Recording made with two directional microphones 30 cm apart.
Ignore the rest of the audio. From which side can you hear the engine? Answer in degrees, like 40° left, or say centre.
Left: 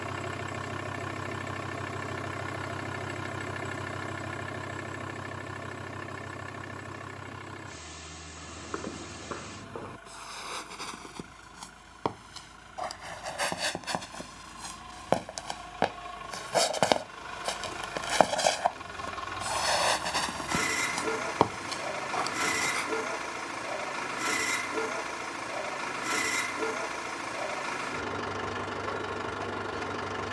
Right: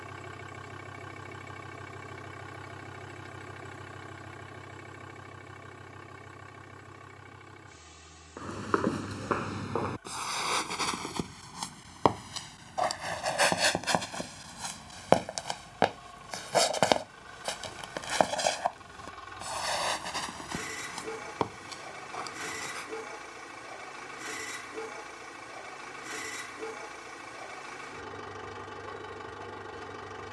50° left.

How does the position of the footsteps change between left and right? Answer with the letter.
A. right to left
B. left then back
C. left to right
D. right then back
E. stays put
A.